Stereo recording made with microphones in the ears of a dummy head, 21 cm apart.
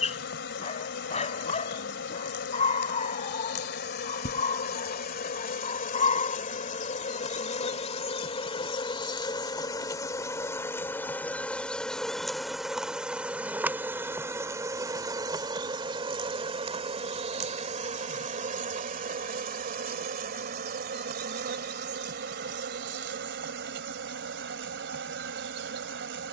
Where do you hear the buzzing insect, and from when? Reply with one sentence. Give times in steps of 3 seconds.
In this clip you hear the buzzing insect on the left from 0 s, in the centre from 9 s and on the right from 15 s.